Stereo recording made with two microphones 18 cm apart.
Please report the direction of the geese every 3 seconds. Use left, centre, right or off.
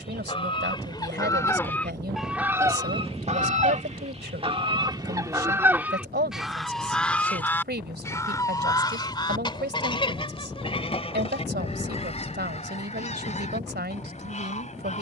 centre, right, centre, left, left.